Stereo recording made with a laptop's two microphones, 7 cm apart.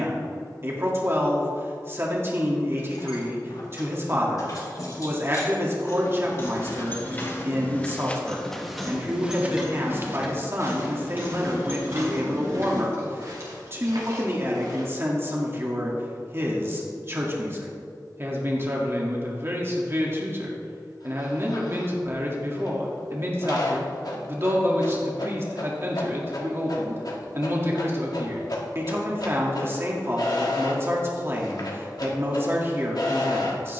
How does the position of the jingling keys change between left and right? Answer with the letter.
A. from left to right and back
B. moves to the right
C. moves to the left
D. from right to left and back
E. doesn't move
B.